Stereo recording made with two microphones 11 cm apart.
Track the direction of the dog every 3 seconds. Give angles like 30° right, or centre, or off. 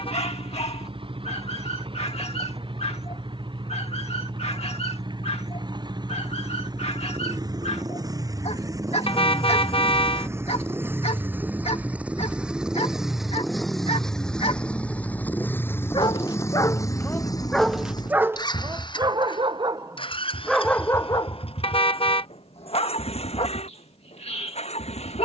70° left, 70° left, 70° left, 70° left, 60° left, 20° left, 20° right, 50° left, 70° left.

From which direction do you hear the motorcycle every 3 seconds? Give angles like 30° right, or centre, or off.
50° right, 50° right, 40° right, 20° right, centre, 30° left, 50° left, 60° left, 70° left.